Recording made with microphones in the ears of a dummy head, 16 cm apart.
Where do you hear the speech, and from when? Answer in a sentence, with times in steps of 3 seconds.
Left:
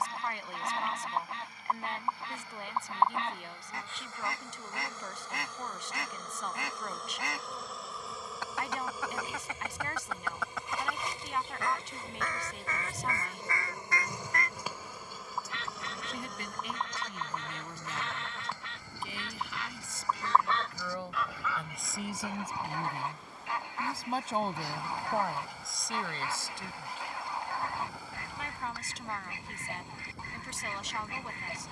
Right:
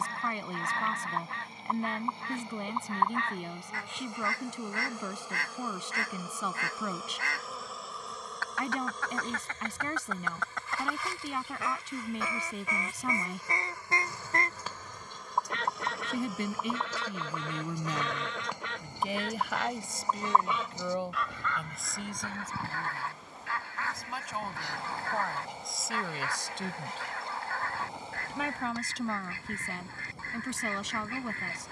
In this clip you hear the speech on the right from 0 s, in the centre from 21 s and on the right from 27 s.